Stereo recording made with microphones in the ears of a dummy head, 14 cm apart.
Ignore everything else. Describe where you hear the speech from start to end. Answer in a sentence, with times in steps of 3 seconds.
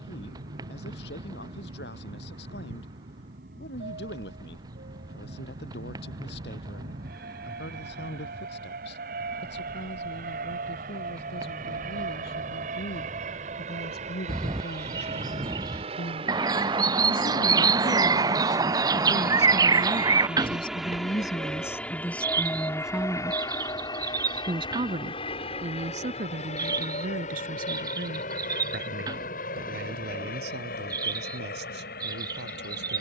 In this clip you hear the speech on the left from 0 s, in the centre from 21 s and on the right from 24 s.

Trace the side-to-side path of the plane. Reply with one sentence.
You can hear the plane go from the right side to the left.